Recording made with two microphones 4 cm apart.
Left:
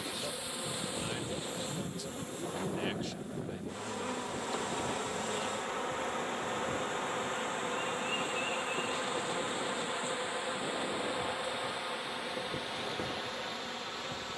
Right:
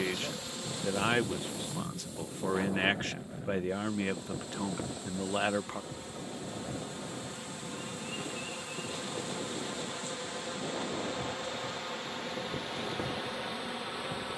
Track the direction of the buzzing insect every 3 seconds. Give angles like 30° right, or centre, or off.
30° left, 60° left, 40° left, 20° left, centre.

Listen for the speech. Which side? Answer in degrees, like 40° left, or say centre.
60° right.